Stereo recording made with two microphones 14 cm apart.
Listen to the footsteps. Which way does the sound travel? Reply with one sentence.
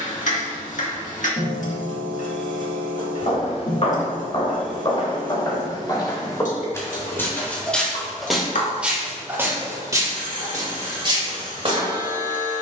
You can hear the footsteps go from the left side to the right.